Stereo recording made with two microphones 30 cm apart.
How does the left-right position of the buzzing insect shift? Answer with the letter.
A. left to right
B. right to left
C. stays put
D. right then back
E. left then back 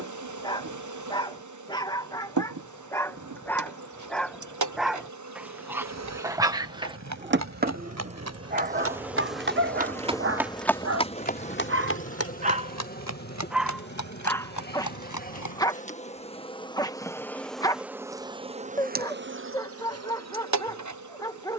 E.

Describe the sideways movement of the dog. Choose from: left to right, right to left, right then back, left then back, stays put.
right then back.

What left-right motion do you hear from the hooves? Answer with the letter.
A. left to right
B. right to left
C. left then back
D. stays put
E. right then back
B.